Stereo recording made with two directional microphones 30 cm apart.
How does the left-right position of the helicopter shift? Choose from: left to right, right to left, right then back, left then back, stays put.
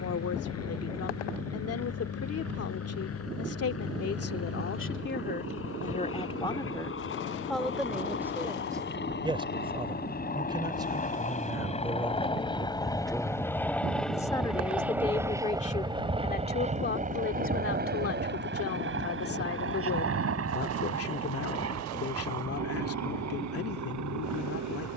left to right.